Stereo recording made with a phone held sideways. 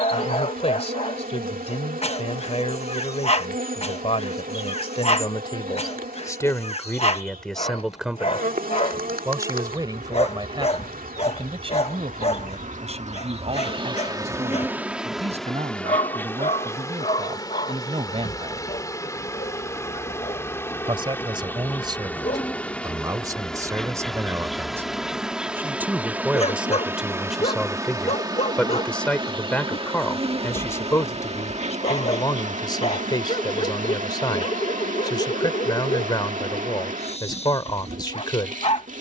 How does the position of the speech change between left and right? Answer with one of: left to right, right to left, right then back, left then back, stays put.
right then back.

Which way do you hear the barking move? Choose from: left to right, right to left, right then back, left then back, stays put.
stays put.